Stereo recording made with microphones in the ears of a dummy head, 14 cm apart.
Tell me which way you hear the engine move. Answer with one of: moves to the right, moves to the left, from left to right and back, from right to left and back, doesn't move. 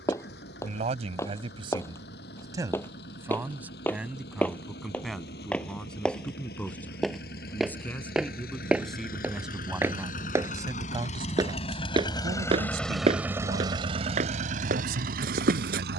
moves to the right.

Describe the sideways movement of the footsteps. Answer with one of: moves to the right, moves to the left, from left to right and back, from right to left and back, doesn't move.
moves to the right.